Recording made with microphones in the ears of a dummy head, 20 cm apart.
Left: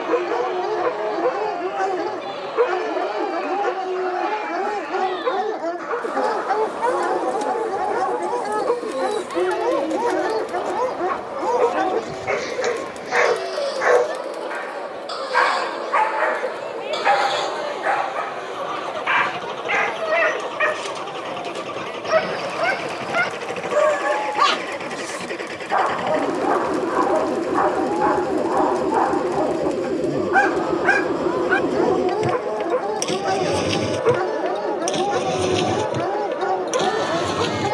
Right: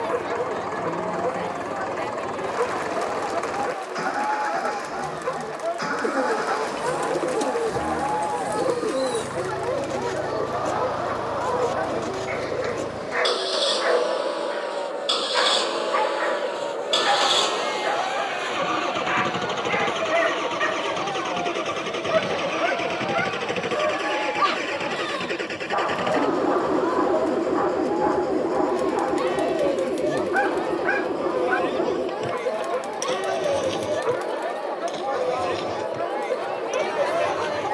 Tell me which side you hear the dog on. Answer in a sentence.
In this clip you hear the dog on the left.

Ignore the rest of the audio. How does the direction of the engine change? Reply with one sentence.
You can hear the engine move from right to left.